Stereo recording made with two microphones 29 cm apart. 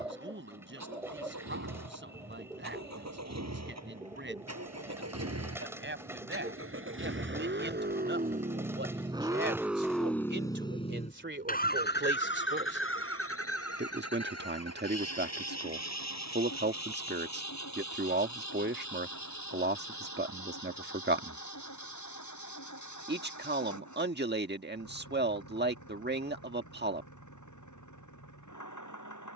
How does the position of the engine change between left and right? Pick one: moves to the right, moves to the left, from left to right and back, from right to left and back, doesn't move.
moves to the left.